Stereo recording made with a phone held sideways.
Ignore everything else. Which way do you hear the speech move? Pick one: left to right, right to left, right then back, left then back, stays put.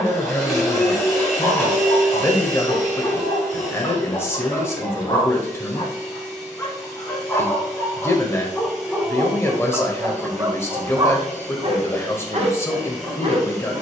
stays put.